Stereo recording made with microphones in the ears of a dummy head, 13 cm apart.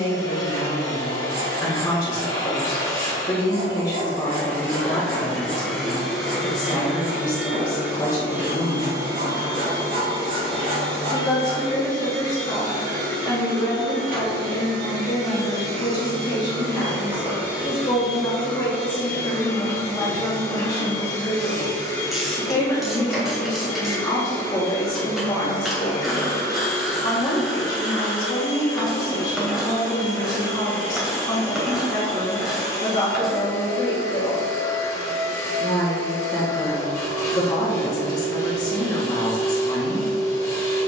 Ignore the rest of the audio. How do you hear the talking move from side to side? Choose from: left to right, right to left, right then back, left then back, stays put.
stays put.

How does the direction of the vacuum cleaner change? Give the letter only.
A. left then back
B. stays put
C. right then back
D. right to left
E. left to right
C.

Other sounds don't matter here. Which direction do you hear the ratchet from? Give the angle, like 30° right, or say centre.
centre.